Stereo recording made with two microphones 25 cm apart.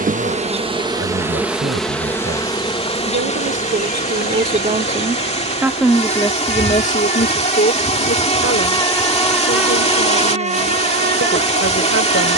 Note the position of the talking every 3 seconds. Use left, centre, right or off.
right, right, left, left.